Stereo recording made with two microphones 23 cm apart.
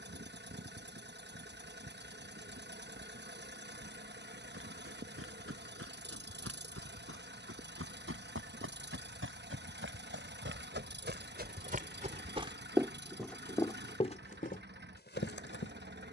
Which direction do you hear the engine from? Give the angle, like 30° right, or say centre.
50° right.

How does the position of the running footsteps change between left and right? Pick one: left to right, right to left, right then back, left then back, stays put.
right to left.